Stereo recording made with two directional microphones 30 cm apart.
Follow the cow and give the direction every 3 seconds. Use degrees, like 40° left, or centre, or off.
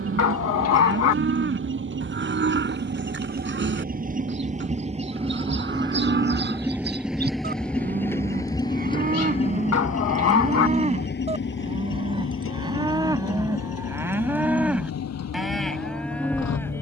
40° right, 40° right, 30° right, 20° right, 10° right, centre.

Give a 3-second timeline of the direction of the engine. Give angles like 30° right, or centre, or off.
40° right, 20° right, centre, 30° left, 50° left, 60° left.